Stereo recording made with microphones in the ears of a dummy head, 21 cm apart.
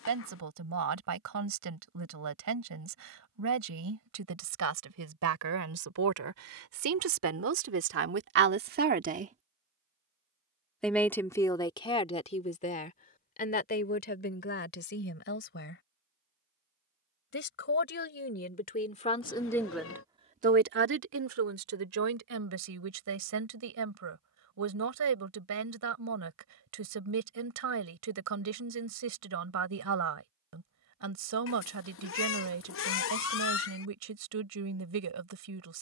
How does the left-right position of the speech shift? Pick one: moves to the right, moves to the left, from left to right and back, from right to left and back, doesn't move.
from right to left and back.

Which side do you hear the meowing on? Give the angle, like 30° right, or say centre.
60° left.